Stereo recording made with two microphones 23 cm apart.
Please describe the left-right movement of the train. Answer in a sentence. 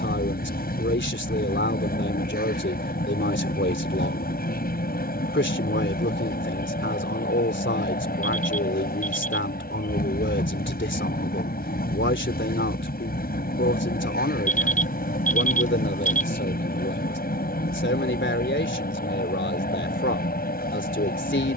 In this clip you hear the train stay put.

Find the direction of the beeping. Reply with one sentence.
You can hear the beeping on the left.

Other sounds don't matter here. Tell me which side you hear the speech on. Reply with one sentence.
In this clip you hear the speech on the left.